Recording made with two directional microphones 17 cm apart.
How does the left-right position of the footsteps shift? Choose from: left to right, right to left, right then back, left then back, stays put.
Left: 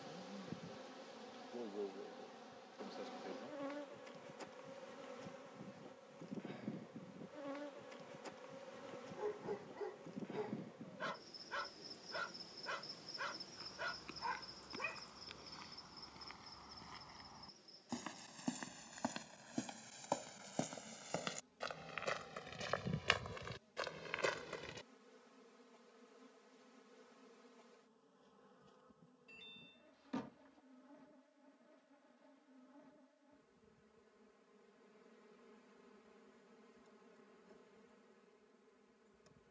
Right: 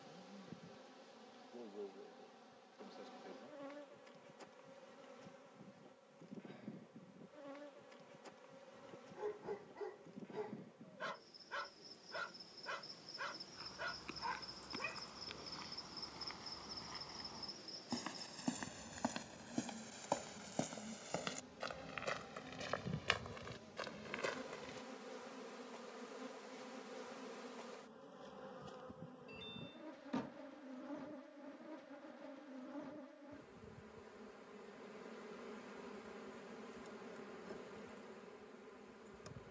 right to left.